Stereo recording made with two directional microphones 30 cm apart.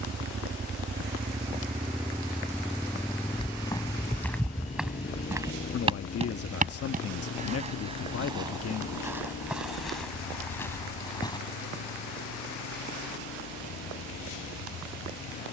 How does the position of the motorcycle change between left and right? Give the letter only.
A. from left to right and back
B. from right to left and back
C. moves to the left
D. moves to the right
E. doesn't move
C.